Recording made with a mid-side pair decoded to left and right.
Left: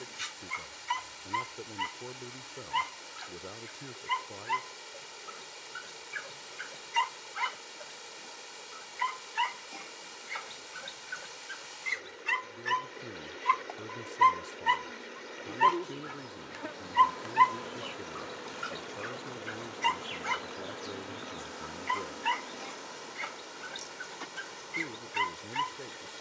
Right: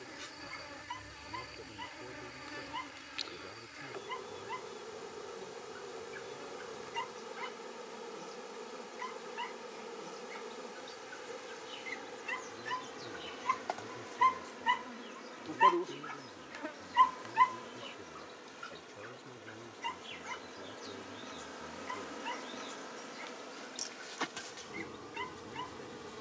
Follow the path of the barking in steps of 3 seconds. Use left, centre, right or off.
left, left, left, left, left, centre, left, left, left.